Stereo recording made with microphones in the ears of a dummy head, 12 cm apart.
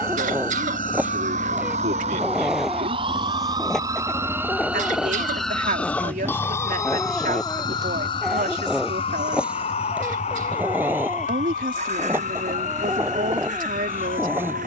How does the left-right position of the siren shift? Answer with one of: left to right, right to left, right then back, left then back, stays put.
right to left.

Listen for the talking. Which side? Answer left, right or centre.
right.